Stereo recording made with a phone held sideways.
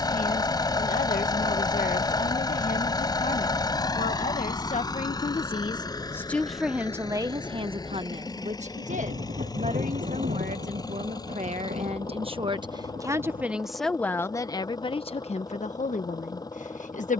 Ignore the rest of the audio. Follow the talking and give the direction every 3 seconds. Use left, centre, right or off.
left, left, right, right, centre, left.